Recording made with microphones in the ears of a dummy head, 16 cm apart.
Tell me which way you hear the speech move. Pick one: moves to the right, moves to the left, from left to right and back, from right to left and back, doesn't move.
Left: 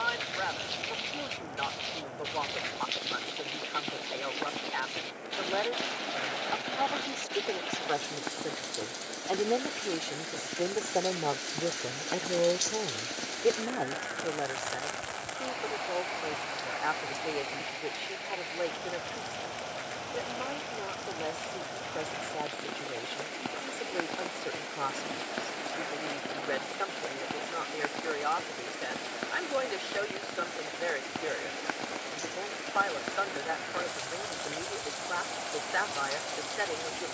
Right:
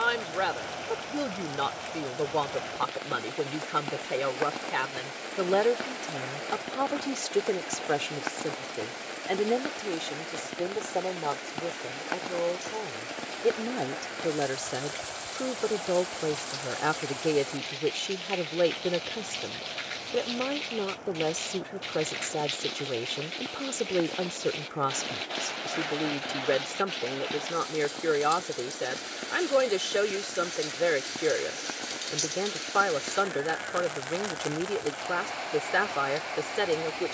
from right to left and back.